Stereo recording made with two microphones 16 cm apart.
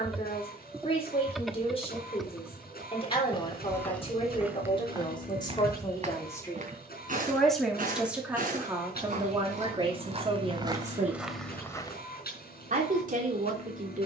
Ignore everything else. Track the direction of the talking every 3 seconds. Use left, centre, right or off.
left, left, centre, right, right.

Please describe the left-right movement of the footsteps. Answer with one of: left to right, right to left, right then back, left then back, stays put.
right then back.